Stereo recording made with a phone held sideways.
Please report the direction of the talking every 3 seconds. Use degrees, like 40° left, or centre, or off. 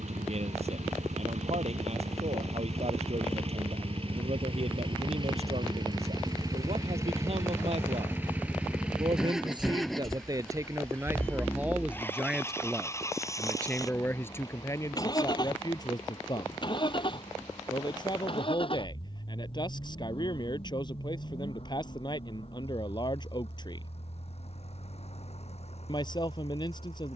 60° right, 60° right, 50° right, 20° right, 10° left, 30° left, 40° left, 40° left, 40° left.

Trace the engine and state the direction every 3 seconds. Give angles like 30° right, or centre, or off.
60° right, 40° right, 20° right, centre, 20° left, 40° left, 40° left, 50° left, 50° left.